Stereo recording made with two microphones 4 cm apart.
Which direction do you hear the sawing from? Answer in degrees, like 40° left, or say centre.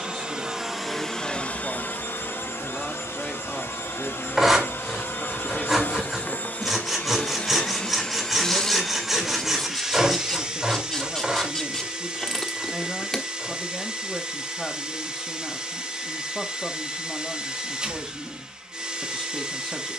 10° right.